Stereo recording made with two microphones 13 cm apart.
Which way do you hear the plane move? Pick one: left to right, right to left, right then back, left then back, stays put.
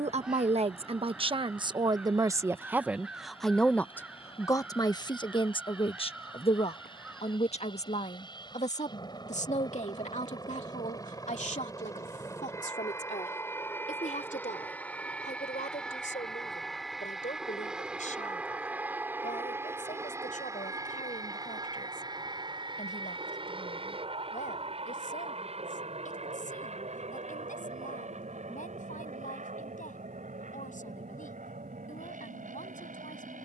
left to right.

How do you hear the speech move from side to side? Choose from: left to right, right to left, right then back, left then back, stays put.
right to left.